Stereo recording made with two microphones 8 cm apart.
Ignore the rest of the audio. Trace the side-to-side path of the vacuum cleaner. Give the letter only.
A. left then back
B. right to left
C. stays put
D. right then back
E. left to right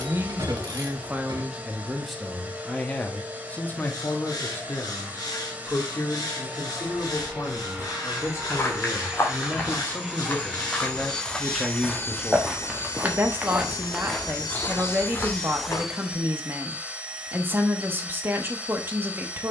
A.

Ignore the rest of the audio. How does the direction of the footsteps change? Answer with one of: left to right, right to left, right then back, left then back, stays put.
right then back.